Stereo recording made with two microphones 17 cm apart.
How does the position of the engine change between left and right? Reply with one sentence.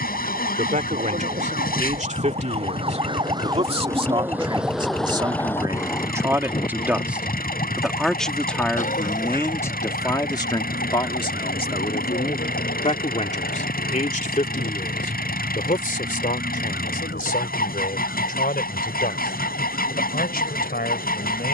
You can hear the engine stay in one place.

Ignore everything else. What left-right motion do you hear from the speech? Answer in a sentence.
You can hear the speech move from right to left.